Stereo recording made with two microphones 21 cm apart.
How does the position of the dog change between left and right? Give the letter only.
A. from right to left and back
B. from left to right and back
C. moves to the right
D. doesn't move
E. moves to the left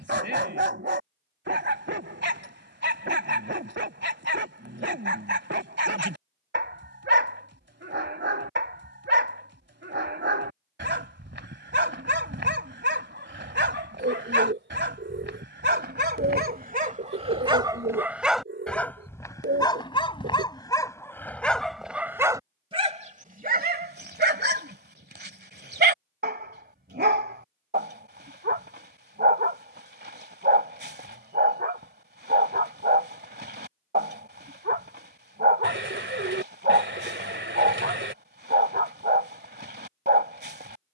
A.